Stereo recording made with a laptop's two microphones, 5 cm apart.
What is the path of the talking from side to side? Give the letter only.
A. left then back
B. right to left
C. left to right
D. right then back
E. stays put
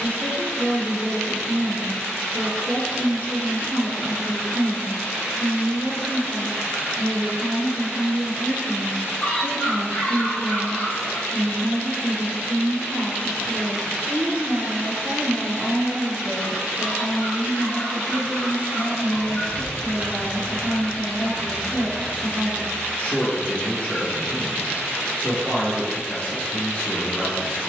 B.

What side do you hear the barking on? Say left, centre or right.
left.